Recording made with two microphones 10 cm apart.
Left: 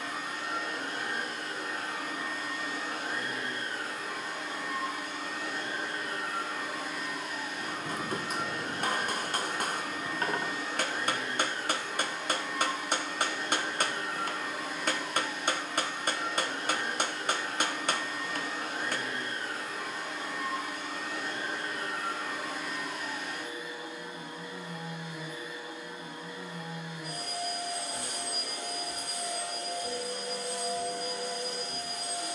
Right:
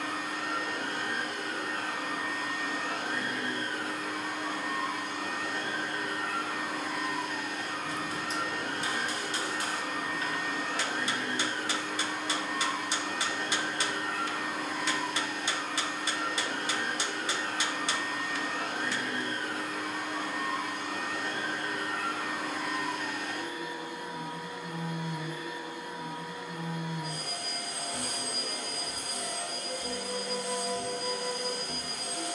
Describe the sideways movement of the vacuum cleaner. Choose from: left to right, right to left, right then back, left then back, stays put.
stays put.